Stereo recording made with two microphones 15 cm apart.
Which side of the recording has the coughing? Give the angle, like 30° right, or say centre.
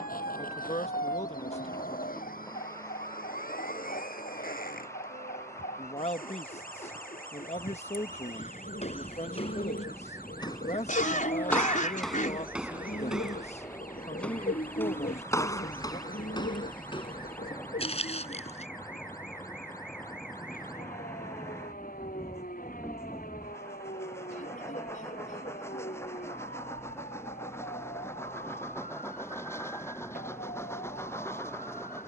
60° left.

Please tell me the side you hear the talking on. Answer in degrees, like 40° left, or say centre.
50° left.